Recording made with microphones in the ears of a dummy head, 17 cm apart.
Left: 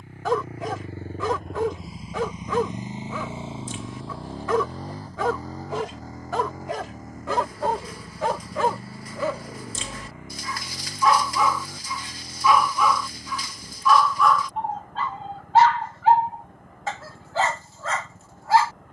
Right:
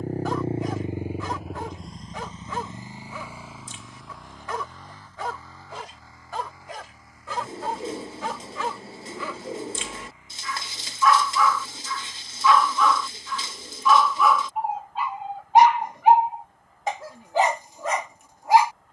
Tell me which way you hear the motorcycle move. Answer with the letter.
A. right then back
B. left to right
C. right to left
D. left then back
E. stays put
C.